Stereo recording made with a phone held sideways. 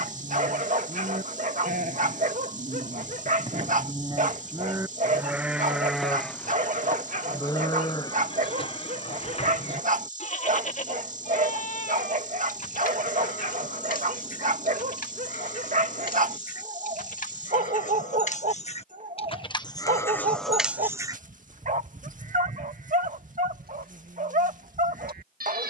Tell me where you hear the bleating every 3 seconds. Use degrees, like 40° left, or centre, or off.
60° right, 20° right, 20° left, 50° left, 60° left, 60° left, 20° left, 60° right, 70° right.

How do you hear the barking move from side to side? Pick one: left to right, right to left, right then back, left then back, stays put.
stays put.